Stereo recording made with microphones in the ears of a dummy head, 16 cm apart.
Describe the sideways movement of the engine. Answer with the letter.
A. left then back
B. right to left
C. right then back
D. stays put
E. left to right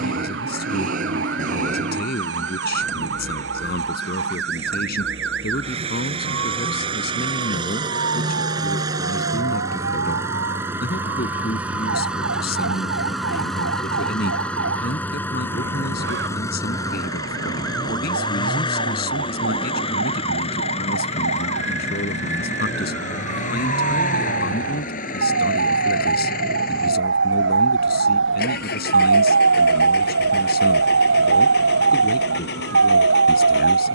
B.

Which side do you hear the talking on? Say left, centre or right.
left.